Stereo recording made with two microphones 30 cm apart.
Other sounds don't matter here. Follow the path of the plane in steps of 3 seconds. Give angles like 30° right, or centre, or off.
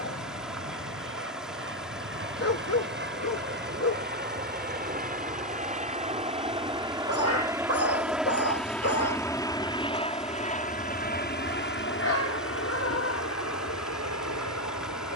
50° right, 30° right, 10° right, 20° left, 50° left.